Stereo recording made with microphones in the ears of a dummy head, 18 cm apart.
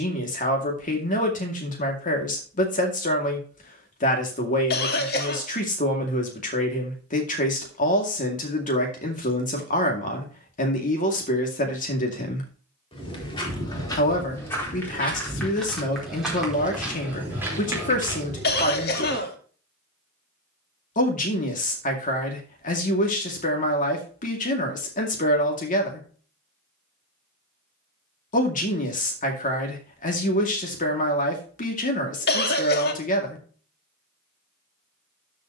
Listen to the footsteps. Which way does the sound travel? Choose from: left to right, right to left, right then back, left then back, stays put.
left to right.